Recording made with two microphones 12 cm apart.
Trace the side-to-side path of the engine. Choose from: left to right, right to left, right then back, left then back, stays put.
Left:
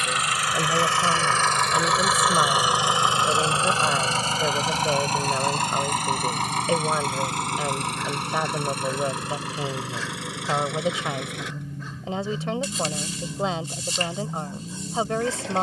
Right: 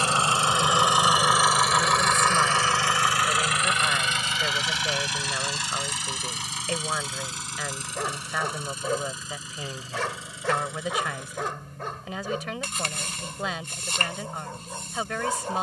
right to left.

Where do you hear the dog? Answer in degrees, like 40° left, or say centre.
60° right.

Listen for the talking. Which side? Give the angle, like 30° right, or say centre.
30° left.